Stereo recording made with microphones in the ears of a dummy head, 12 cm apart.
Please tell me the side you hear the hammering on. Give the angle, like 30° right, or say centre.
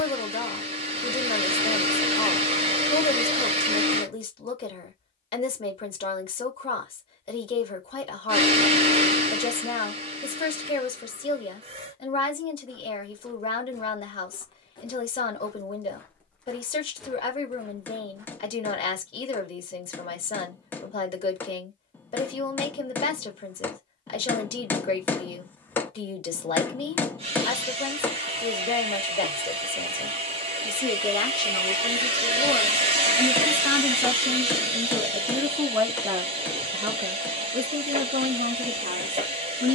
10° left.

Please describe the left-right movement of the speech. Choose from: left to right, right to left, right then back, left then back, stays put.
left to right.